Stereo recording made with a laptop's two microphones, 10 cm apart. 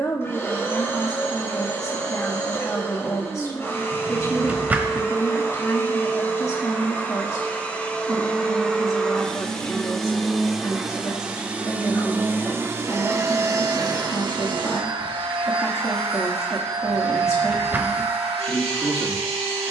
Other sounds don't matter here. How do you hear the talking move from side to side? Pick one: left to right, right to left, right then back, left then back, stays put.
stays put.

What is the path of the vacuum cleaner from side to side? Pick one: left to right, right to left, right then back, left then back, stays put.
left to right.